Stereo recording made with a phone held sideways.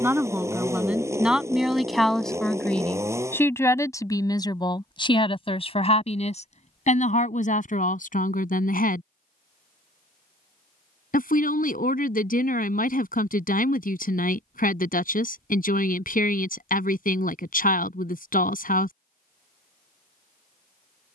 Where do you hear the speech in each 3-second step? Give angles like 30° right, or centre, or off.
centre, 30° left, 60° left, 60° left, 60° left, 60° left, 60° left.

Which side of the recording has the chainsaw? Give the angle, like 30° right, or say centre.
20° right.